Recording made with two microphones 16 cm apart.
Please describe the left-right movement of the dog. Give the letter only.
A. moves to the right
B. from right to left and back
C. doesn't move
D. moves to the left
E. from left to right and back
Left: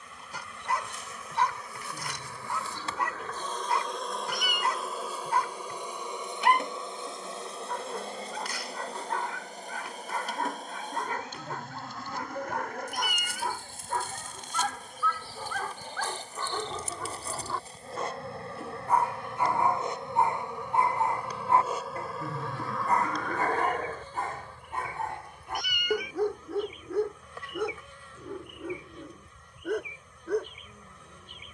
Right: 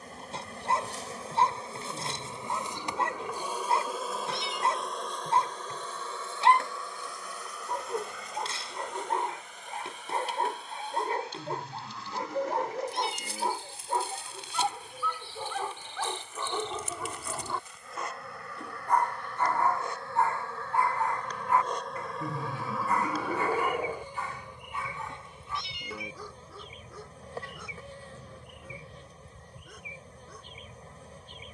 D.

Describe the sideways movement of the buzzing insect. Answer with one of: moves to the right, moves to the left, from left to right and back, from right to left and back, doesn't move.
from right to left and back.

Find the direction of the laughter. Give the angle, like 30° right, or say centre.
10° right.